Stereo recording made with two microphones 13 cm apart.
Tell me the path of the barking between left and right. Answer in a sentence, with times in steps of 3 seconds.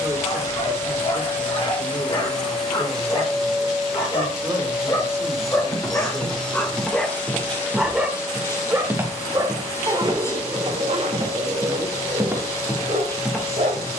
In this clip you hear the barking on the left from 0 s, in the centre from 6 s and on the right from 9 s.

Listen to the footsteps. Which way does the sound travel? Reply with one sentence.
You can hear the footsteps move from left to right and back again.